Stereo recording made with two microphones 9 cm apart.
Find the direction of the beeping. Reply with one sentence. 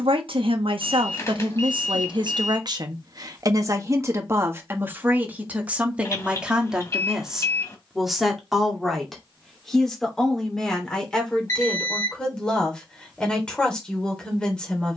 In this clip you hear the beeping on the left.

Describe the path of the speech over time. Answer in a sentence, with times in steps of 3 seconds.
In this clip you hear the speech on the right from 0 s and in the centre from 6 s.